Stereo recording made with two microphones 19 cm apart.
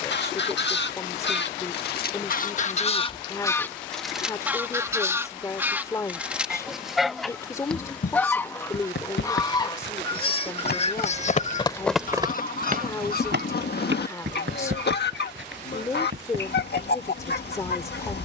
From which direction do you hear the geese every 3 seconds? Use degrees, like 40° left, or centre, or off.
60° left, centre, centre, 30° left, 50° left, 60° left.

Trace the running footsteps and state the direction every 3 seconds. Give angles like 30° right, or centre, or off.
off, off, 80° left, 50° left, 60° right, 80° right.